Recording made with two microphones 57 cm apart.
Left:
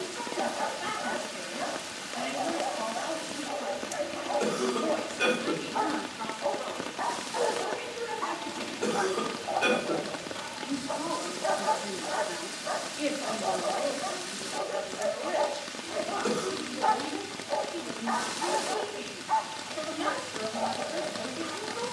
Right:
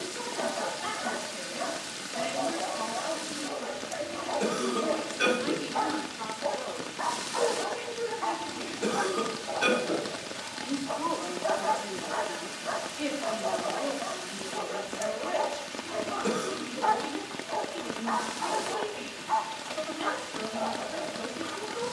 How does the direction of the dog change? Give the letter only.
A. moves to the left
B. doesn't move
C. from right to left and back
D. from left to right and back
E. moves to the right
A.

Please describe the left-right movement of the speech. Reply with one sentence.
You can hear the speech move from right to left and back again.